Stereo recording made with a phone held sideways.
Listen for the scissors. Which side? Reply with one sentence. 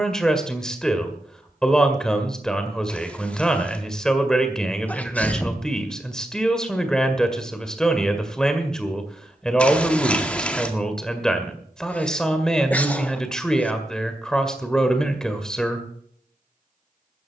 In this clip you hear the scissors in the centre.